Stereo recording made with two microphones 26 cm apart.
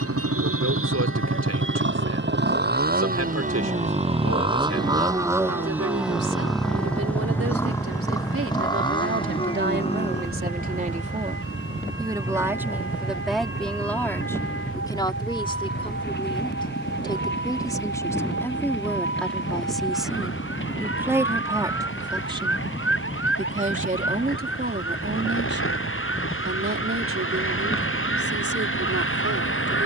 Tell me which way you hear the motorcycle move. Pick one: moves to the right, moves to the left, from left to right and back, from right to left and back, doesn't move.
moves to the left.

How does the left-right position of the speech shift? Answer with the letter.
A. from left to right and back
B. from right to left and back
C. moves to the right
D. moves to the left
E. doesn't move
B.